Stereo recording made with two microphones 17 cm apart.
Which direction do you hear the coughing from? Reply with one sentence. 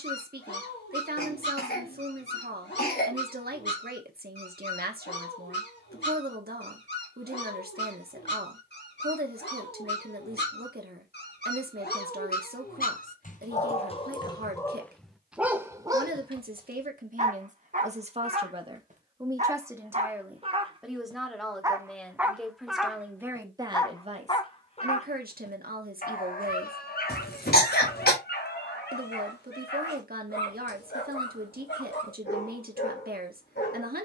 You can hear the coughing on the left.